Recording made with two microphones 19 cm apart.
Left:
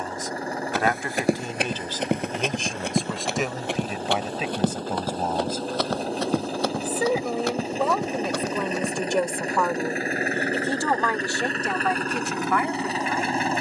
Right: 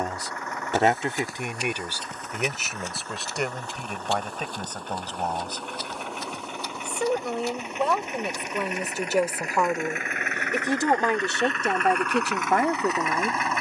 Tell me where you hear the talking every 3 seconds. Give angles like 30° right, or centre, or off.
20° right, 10° left, centre, 20° right, 40° right.